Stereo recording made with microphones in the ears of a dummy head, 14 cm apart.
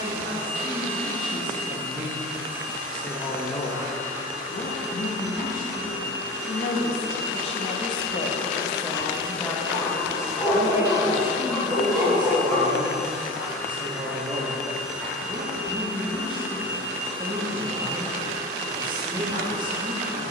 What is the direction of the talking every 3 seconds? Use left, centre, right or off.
right, left, left, centre, right, right, right.